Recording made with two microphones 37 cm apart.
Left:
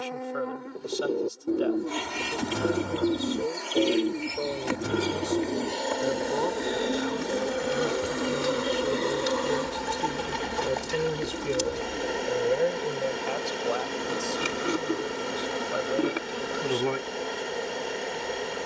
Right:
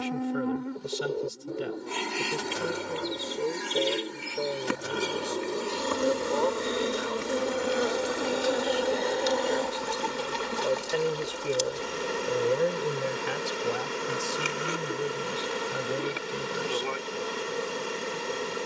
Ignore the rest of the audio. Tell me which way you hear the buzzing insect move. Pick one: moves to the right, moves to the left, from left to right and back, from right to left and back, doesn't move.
moves to the left.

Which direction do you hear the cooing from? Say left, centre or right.
left.